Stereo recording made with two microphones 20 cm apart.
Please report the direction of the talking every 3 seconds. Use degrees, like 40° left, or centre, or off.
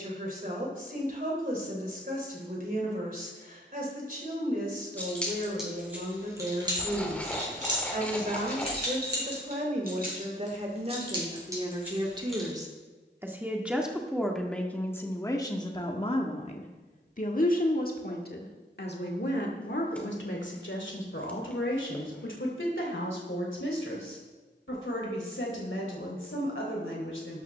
50° right, 50° right, 40° right, 30° right, 10° right, 30° left, 60° left, 80° left, 80° left.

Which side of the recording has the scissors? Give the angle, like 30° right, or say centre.
10° left.